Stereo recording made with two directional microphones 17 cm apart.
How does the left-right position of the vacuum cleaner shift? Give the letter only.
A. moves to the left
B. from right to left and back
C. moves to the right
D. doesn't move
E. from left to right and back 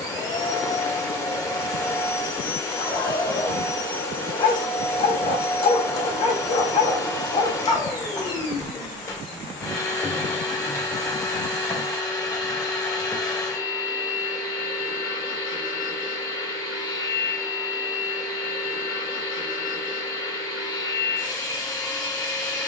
D.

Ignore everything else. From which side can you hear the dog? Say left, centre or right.
left.